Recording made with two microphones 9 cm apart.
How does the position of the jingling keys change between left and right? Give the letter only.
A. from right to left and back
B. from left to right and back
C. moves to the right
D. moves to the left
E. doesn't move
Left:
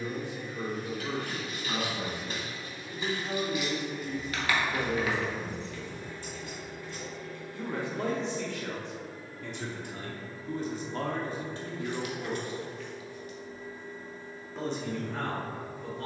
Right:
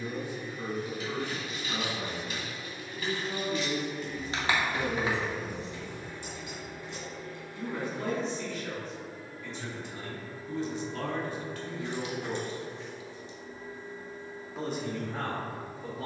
C.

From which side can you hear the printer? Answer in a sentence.
In this clip you hear the printer on the right.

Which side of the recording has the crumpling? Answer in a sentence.
You can hear the crumpling on the right.